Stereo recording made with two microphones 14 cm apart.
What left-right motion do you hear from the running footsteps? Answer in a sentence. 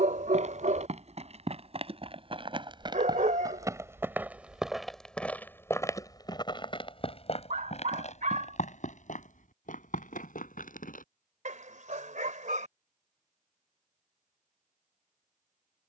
In this clip you hear the running footsteps move to the left.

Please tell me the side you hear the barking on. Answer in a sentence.
You can hear the barking on the right.